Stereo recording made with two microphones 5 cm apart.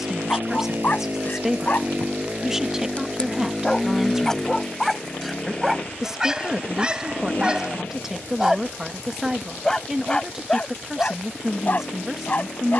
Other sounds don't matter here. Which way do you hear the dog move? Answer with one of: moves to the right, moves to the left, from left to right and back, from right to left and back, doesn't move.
from left to right and back.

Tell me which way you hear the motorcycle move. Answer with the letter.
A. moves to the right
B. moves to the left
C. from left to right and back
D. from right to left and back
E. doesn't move
B.